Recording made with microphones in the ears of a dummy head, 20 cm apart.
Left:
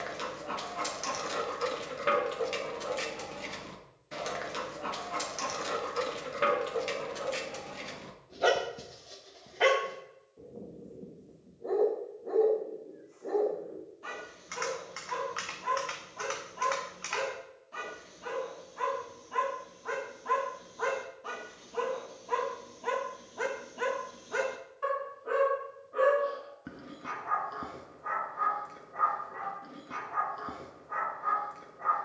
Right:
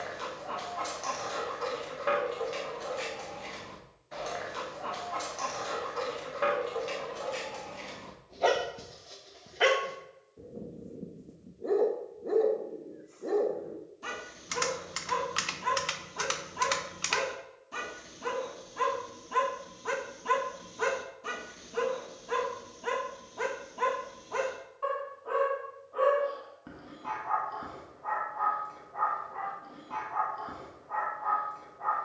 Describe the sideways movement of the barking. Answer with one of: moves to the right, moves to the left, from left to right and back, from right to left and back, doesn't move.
from left to right and back.